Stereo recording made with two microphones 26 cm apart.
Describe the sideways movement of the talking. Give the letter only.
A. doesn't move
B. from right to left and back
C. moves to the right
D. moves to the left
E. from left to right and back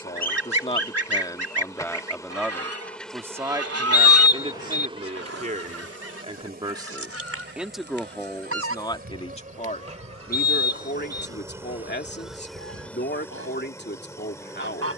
E.